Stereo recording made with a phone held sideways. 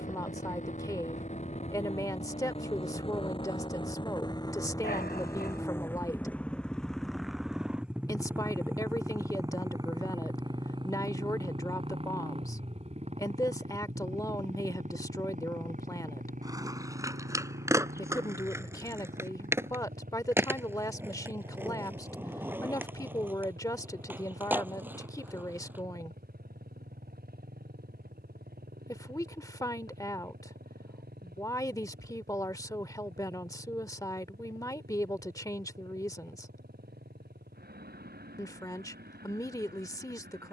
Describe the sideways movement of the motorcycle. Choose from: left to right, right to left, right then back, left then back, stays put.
left to right.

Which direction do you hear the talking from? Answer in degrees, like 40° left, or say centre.
20° left.